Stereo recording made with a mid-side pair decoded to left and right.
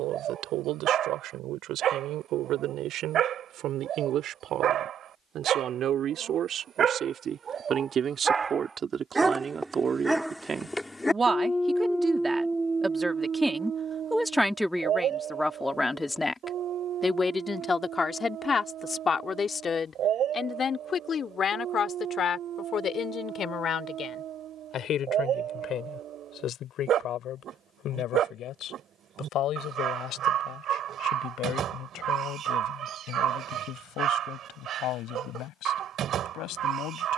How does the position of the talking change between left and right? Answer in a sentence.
You can hear the talking move from right to left.